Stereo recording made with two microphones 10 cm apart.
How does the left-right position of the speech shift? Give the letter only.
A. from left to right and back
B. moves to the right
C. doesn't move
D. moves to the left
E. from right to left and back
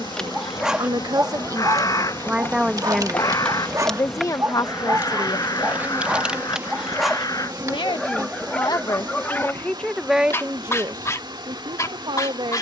E.